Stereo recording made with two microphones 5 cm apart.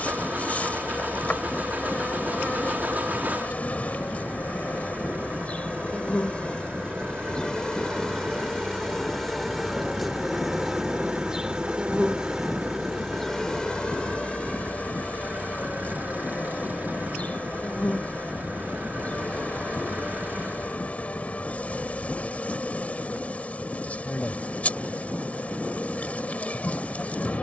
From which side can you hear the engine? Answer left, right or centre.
right.